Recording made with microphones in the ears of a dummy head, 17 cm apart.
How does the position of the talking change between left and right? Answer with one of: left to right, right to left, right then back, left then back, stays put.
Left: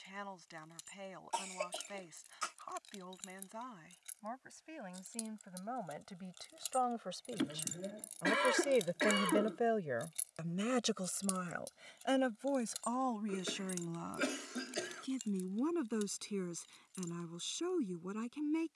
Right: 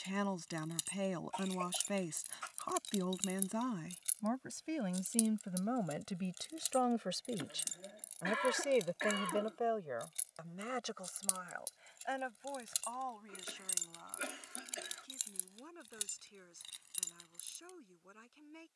right to left.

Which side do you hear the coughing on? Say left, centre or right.
left.